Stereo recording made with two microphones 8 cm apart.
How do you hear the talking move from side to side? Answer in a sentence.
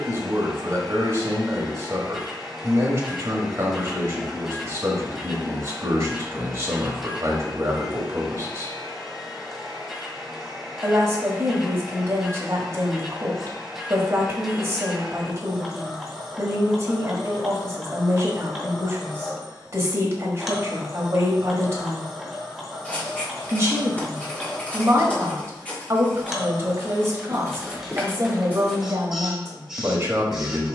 You can hear the talking stay in one place.